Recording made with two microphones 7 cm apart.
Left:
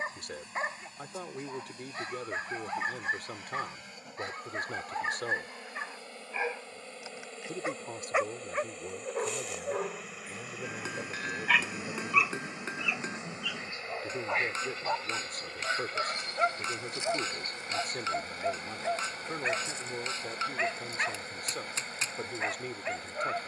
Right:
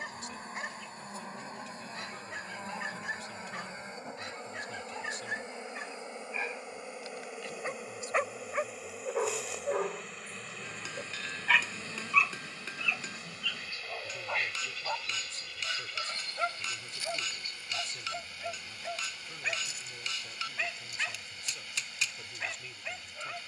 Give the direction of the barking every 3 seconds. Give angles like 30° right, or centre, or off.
30° left, 30° left, 10° left, 10° right, 10° left, 20° left, 30° left, 30° left.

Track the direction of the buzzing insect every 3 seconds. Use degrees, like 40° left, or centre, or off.
40° right, 30° right, 10° right, 10° left, 30° left, 40° left, 50° left, 50° left.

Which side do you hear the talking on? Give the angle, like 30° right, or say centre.
60° left.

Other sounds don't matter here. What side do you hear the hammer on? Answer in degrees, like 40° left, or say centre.
30° left.